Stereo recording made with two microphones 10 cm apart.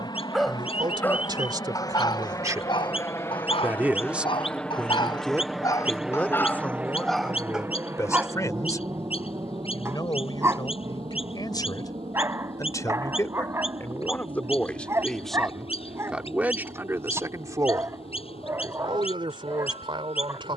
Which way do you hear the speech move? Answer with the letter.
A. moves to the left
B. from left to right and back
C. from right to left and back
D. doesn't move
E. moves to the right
C.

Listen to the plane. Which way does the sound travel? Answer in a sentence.
In this clip you hear the plane move to the right.